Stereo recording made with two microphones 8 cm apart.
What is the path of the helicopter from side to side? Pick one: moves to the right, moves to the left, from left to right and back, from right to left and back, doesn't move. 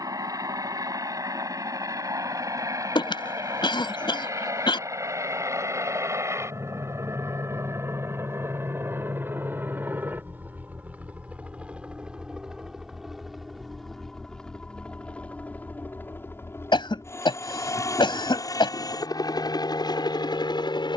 moves to the left.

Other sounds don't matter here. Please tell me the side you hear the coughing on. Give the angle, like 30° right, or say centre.
70° left.